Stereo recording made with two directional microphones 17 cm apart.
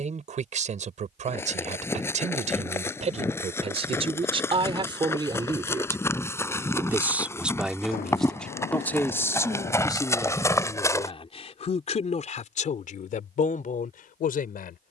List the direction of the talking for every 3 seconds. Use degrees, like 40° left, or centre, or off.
50° right, 30° right, centre, 30° left, 50° left.